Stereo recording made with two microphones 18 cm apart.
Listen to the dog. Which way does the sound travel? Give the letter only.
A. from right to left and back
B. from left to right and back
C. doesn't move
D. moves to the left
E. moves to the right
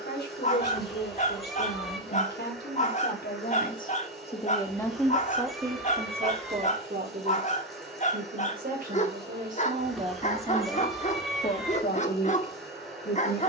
C.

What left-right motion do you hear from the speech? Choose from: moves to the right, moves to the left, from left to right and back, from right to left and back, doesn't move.
from left to right and back.